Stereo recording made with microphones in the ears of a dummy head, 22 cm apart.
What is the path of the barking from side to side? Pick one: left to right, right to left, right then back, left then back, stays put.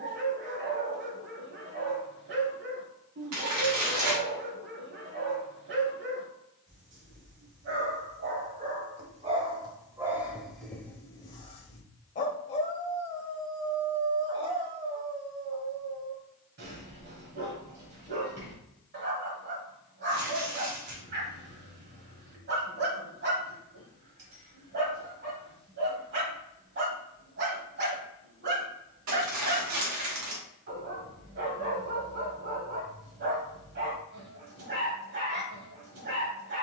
left then back.